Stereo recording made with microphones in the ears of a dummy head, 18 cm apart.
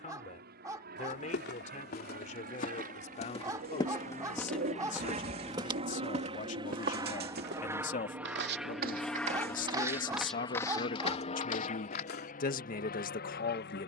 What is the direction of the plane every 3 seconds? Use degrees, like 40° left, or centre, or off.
50° right, 40° right, 10° right, 20° left, 50° left.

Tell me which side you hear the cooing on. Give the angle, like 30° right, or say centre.
50° right.